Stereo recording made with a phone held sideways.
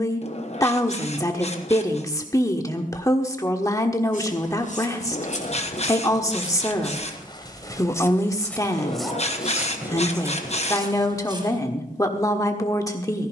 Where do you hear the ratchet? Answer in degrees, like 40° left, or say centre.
50° left.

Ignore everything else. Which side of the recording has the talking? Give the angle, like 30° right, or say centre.
20° left.